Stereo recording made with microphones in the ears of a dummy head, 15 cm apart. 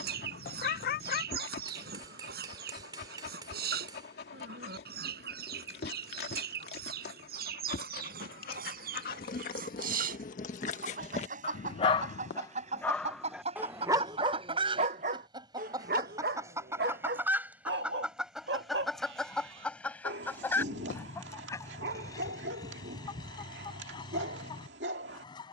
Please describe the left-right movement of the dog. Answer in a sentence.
You can hear the dog move to the right.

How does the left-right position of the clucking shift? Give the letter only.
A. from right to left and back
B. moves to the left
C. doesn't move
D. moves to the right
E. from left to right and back
B.